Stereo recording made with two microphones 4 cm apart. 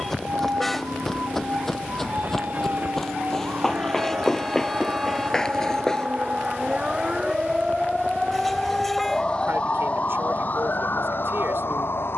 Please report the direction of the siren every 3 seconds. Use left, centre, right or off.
right, right, centre, left.